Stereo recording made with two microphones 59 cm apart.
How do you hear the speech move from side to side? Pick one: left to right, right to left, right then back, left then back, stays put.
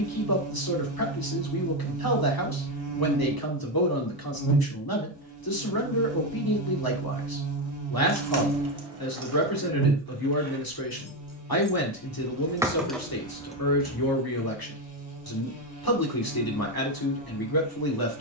stays put.